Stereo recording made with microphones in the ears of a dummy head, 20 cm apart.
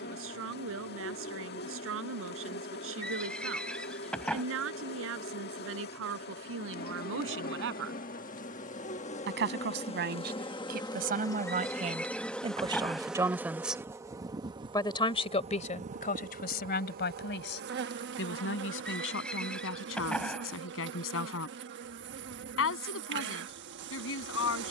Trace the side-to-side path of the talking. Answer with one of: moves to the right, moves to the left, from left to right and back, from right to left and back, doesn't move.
moves to the left.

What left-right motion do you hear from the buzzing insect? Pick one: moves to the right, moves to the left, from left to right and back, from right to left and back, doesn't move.
moves to the right.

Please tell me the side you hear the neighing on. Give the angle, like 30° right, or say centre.
centre.